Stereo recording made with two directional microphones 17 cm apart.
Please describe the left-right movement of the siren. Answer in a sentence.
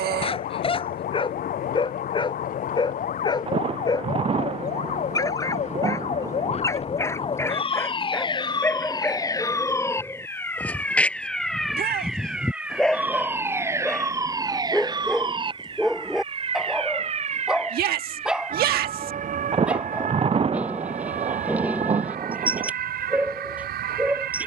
In this clip you hear the siren travel towards the right.